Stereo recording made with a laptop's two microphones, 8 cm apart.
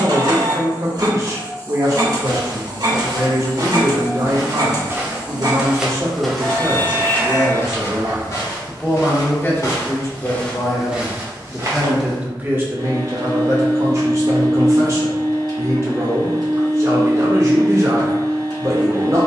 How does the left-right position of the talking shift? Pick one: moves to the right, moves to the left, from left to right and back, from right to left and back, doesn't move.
from right to left and back.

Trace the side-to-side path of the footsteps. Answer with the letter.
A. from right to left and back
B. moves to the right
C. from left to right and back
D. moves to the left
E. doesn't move
A.